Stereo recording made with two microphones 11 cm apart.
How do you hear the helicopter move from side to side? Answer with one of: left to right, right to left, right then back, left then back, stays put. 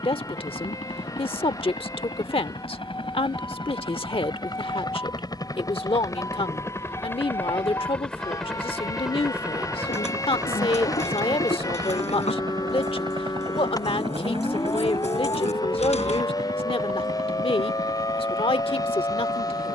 left to right.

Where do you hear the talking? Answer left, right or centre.
left.